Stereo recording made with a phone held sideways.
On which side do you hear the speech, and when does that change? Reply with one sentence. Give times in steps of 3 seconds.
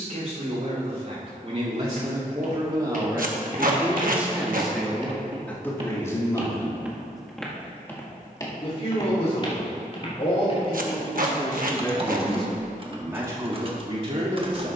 In this clip you hear the speech on the right from 0 s, in the centre from 3 s, on the left from 6 s and on the right from 12 s.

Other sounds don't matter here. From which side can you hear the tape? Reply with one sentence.
In this clip you hear the tape on the right.